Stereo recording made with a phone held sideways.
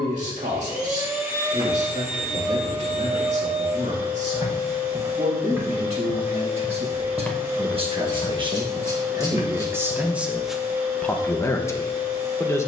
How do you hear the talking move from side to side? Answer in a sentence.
You can hear the talking move to the left.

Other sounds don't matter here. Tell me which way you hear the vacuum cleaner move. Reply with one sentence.
In this clip you hear the vacuum cleaner stay in one place.